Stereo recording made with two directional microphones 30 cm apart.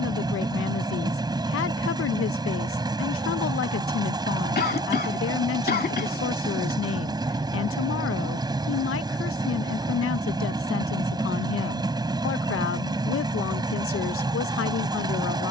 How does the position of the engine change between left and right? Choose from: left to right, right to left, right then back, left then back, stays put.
stays put.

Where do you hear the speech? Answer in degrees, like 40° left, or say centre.
50° left.